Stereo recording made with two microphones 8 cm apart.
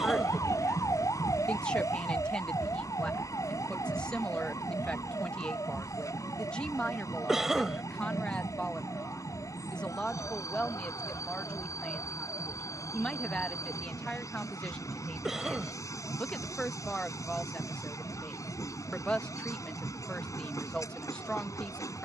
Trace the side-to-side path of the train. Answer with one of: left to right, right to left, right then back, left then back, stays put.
stays put.